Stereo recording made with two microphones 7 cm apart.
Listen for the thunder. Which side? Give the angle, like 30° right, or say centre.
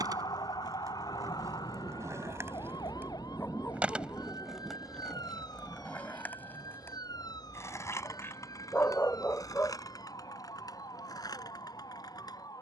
10° left.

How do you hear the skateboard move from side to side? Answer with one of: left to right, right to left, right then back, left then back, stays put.
right to left.